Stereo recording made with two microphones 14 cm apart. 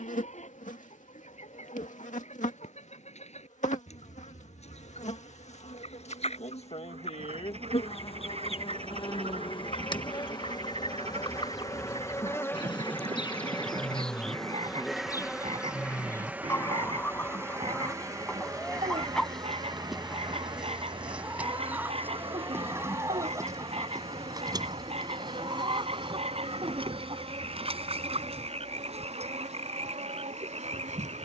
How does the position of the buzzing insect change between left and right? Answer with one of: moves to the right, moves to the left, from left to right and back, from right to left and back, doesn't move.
moves to the right.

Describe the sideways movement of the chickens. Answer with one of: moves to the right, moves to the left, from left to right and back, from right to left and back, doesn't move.
moves to the right.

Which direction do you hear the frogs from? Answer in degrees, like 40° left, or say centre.
50° right.